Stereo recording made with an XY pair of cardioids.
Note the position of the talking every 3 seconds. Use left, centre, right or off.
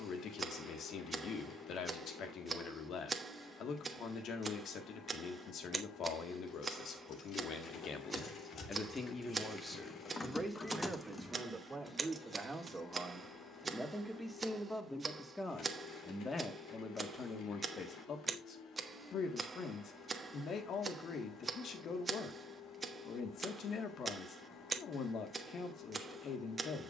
left, left, left, centre, centre, left, left, left, left.